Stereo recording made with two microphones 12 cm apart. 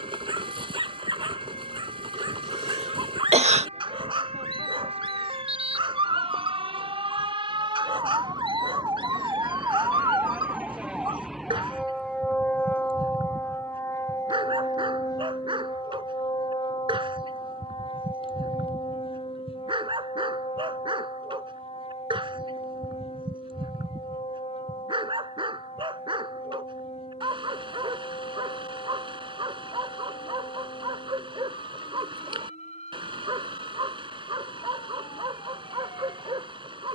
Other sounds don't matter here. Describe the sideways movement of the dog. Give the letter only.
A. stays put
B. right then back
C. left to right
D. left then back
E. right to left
A.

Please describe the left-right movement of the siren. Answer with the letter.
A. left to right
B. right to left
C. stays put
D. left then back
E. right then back
B.